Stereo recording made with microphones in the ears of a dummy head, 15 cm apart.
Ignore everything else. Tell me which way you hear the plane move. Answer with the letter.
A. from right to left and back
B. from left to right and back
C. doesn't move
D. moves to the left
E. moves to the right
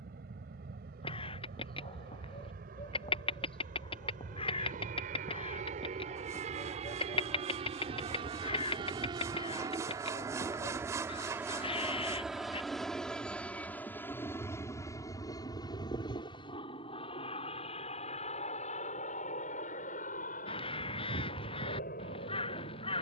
D.